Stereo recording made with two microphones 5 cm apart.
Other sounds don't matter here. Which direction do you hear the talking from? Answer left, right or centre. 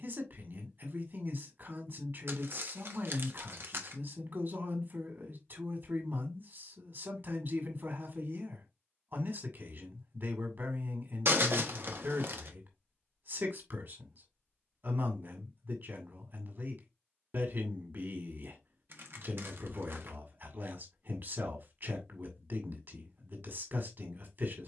right.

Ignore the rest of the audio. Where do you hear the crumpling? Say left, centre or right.
right.